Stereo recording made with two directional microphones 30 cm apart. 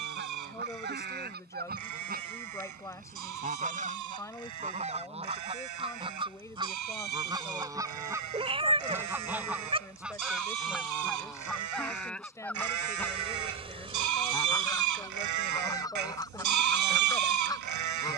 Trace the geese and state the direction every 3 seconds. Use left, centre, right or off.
right, right, centre, centre, centre, centre.